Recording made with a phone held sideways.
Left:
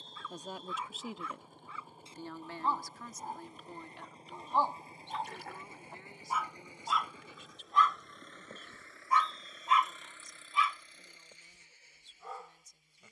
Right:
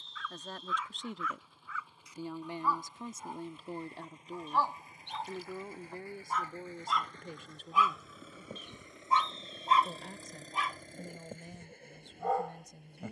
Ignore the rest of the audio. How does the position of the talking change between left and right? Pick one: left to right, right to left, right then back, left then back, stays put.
left to right.